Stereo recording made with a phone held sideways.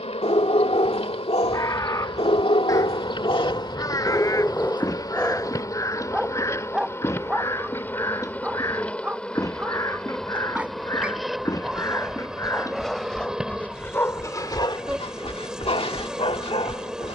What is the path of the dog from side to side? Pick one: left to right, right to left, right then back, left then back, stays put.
right then back.